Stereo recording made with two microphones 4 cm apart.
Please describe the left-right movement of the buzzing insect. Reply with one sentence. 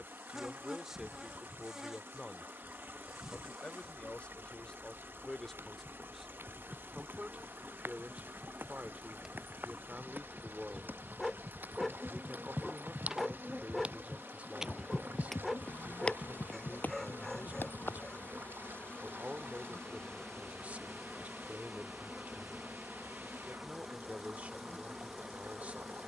You can hear the buzzing insect go left and come back.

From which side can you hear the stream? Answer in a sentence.
You can hear the stream on the right.